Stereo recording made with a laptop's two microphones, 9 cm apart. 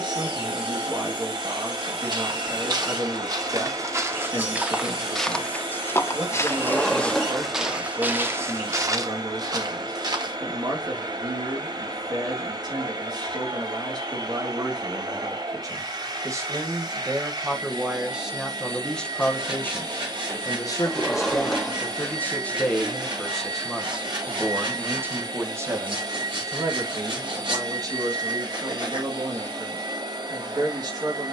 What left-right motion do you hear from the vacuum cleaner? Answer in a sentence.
In this clip you hear the vacuum cleaner stay in one place.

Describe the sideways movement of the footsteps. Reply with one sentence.
In this clip you hear the footsteps go left and come back.